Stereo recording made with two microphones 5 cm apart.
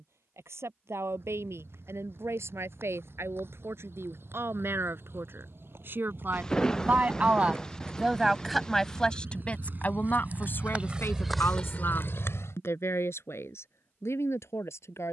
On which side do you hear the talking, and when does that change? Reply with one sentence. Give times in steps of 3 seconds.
You can hear the talking on the right from 0 s and on the left from 9 s.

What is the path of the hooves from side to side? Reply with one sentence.
In this clip you hear the hooves go from the right side to the left.